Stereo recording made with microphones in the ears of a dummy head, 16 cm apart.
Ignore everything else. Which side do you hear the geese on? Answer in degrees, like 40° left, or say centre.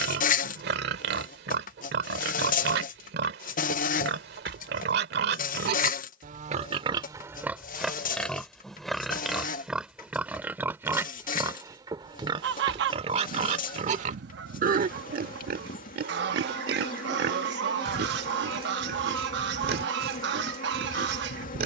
60° right.